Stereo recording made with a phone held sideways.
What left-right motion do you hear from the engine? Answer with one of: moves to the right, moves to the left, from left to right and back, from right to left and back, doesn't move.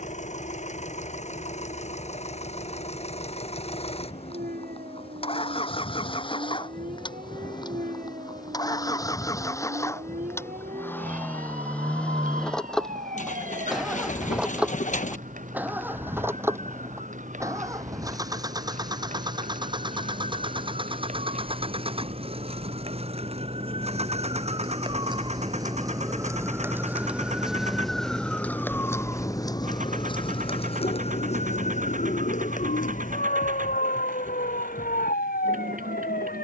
moves to the right.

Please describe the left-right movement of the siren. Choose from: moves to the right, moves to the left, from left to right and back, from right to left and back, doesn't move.
moves to the left.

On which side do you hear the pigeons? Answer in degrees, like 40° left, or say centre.
60° left.